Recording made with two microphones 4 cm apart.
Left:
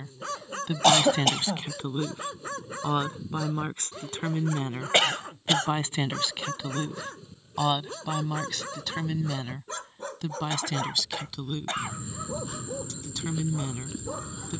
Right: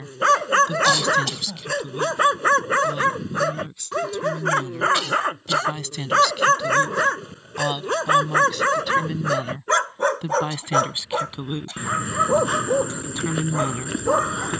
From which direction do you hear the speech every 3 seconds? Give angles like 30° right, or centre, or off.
30° left, 40° left, 10° left, 20° right, 30° right.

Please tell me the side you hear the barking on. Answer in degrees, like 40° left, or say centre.
70° right.